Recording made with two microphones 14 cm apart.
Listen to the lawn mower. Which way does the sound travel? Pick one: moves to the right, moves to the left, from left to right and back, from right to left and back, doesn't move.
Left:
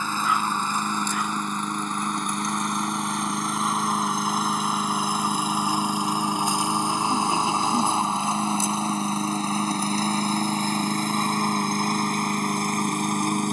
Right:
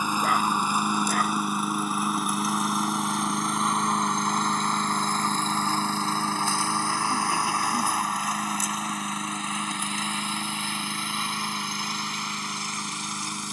moves to the left.